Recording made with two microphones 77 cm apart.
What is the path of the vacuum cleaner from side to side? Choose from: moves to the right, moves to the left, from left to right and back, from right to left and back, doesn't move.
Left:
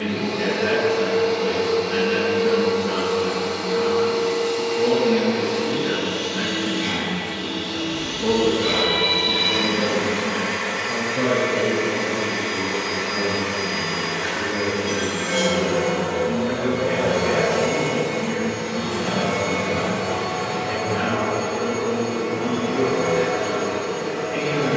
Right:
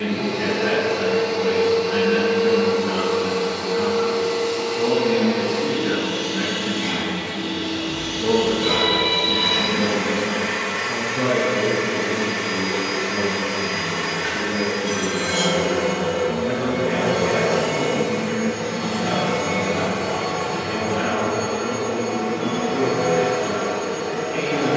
from left to right and back.